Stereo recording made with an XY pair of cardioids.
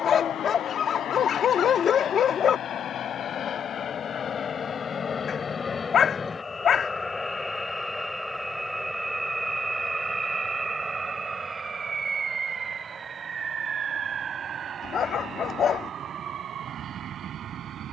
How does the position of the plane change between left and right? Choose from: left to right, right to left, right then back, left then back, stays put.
left to right.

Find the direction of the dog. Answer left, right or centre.
left.